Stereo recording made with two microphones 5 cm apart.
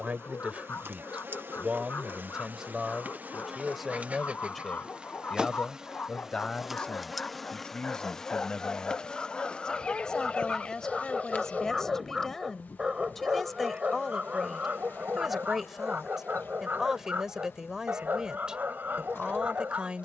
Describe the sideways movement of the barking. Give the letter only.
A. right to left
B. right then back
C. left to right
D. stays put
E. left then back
C.